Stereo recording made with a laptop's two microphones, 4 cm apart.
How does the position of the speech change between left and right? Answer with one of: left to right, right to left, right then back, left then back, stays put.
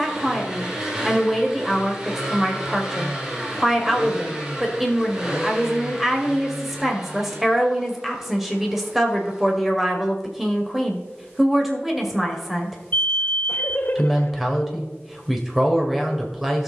stays put.